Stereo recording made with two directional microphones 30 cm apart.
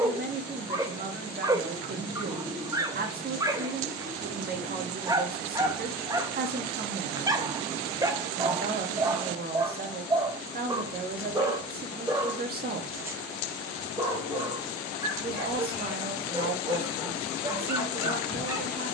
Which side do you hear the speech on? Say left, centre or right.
right.